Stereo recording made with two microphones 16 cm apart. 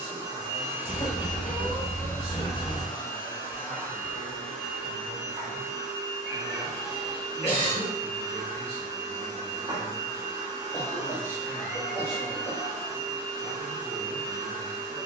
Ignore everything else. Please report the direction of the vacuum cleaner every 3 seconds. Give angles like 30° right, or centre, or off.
centre, centre, 20° right, 20° right, 20° right.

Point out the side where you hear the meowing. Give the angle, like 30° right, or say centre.
30° left.